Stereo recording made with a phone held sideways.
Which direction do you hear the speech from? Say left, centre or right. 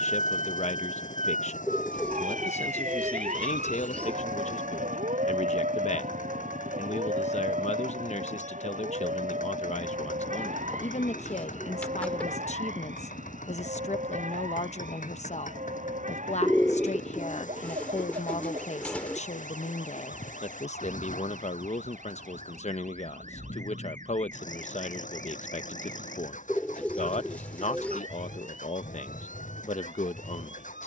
left.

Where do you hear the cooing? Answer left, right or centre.
centre.